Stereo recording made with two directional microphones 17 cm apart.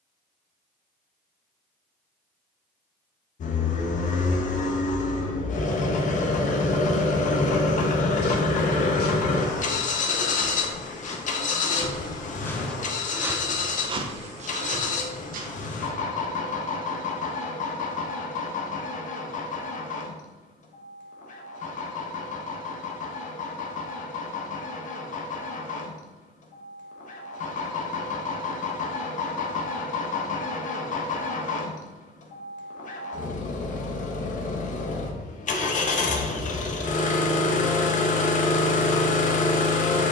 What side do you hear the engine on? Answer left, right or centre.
left.